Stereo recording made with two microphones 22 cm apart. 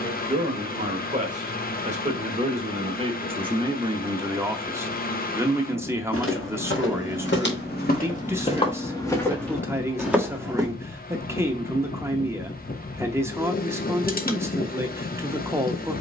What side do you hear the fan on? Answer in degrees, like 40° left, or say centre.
40° left.